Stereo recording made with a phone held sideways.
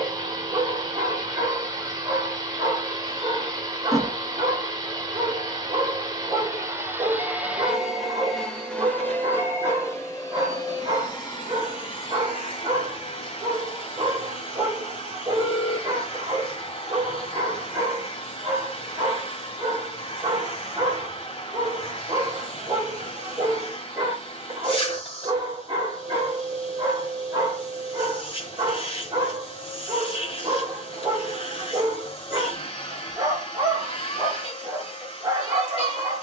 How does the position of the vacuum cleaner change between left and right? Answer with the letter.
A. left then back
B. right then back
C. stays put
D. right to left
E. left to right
D.